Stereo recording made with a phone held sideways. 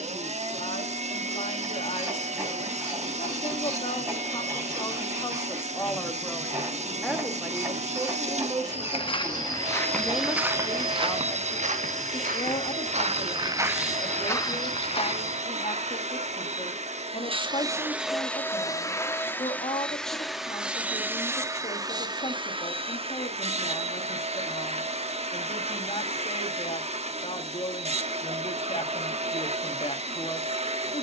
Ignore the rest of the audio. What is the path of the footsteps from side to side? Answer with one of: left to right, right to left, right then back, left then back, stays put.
right then back.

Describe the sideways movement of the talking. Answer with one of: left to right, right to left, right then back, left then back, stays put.
right then back.